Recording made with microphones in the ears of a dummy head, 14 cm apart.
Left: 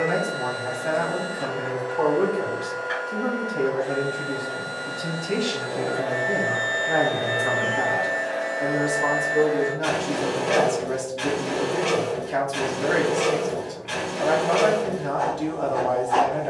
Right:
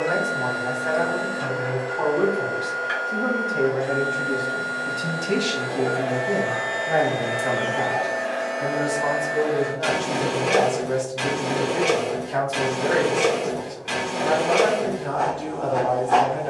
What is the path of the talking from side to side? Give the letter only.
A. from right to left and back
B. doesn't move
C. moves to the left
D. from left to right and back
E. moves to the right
D.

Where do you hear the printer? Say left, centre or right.
right.